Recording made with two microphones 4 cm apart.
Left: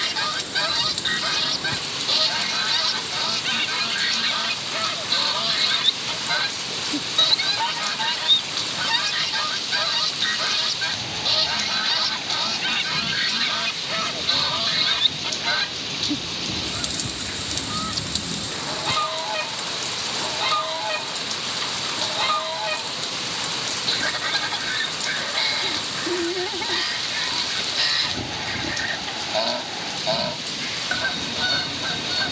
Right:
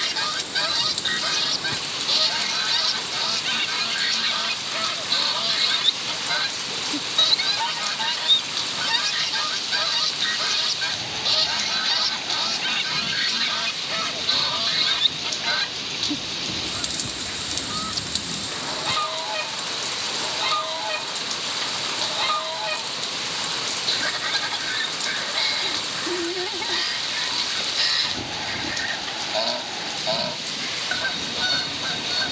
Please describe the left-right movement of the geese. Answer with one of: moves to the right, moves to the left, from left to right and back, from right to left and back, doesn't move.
doesn't move.